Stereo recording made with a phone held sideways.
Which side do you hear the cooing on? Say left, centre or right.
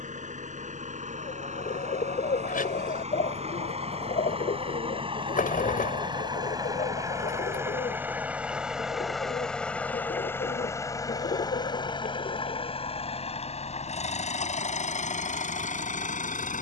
left.